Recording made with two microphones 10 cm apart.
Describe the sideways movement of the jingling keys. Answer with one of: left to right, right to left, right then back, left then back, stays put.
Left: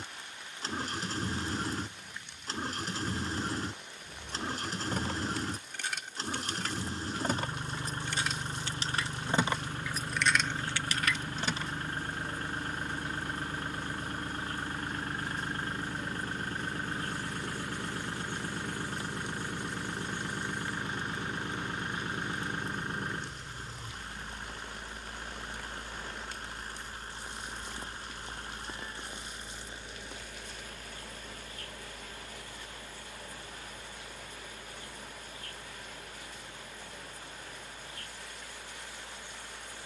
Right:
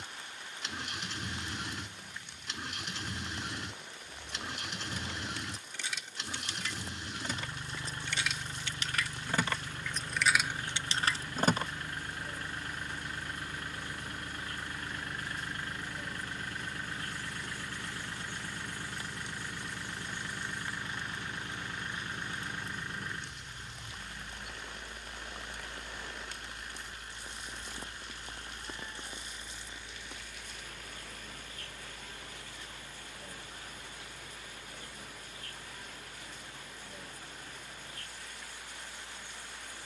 left to right.